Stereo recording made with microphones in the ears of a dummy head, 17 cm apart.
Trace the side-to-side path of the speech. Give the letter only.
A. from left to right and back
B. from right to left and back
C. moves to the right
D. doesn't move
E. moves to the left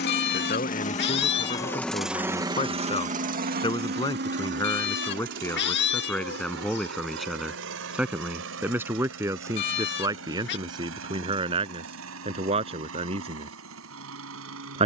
C.